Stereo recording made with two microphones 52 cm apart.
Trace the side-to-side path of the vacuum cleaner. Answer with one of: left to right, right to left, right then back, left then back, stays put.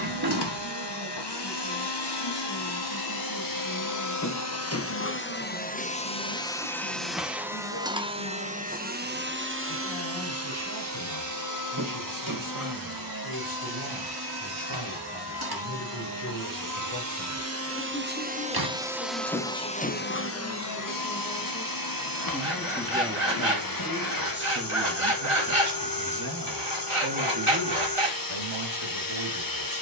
right then back.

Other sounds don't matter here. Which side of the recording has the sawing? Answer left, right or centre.
right.